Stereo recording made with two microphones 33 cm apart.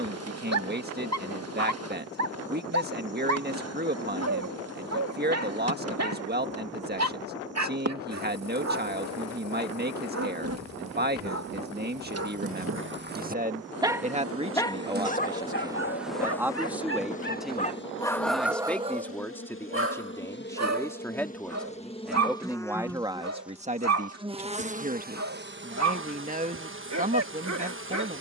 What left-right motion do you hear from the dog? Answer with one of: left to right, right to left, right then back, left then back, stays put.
left then back.